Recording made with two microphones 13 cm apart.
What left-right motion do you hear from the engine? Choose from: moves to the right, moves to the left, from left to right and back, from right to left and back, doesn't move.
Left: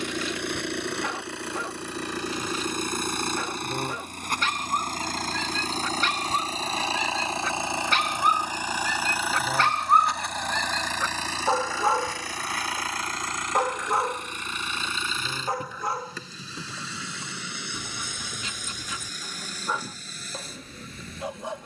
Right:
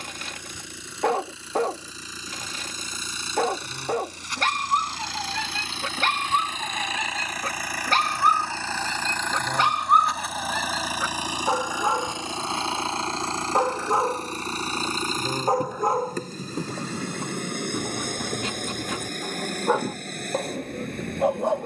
moves to the right.